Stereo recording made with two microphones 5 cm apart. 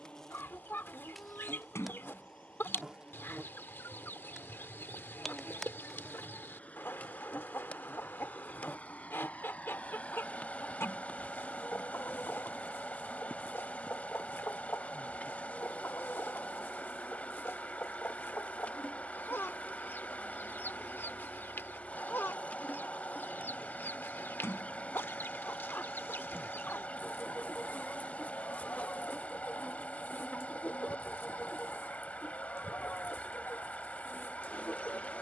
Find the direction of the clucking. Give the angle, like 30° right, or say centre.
40° left.